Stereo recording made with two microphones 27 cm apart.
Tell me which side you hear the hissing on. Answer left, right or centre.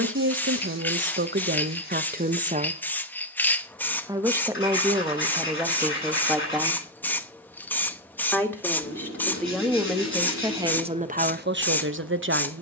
centre.